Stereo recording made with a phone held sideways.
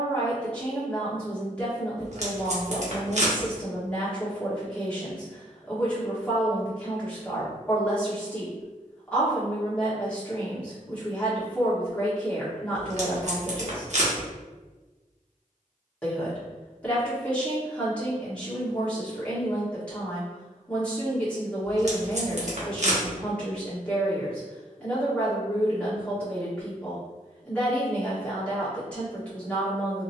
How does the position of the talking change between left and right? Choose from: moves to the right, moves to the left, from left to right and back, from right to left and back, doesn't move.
doesn't move.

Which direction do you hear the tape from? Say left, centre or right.
right.